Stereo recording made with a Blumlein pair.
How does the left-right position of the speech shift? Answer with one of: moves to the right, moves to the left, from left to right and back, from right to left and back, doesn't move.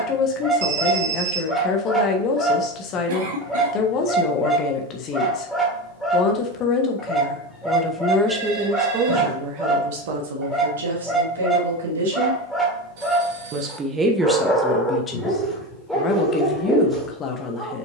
from left to right and back.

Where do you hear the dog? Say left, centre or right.
centre.